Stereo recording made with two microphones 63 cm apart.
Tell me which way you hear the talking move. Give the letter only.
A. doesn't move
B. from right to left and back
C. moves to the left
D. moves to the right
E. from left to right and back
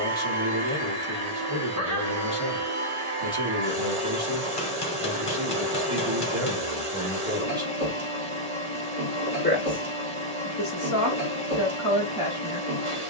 C.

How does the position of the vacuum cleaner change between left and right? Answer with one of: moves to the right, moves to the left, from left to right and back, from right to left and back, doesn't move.
doesn't move.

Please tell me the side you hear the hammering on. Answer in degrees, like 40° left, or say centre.
40° left.